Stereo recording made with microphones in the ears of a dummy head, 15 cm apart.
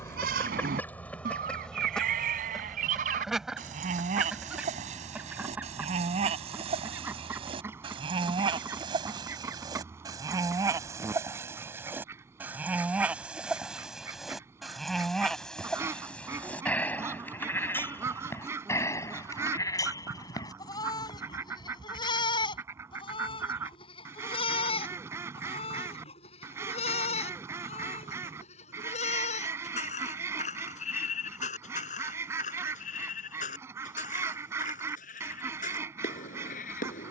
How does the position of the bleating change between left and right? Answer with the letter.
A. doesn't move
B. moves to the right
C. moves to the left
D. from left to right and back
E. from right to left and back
C.